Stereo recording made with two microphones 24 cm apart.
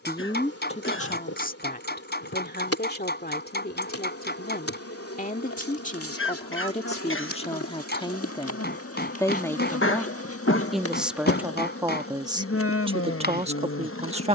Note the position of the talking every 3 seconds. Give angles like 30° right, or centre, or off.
30° left, 40° left, 20° left, centre, 20° right.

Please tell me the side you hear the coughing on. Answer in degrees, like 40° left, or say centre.
60° left.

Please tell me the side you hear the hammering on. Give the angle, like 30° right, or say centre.
50° left.